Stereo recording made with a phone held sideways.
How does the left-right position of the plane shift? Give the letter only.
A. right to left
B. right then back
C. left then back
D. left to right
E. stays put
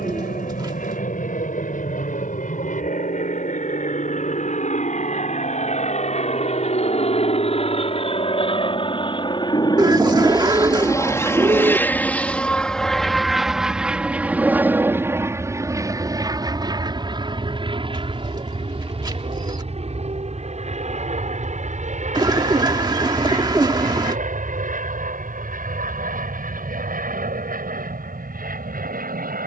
D.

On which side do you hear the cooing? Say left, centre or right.
right.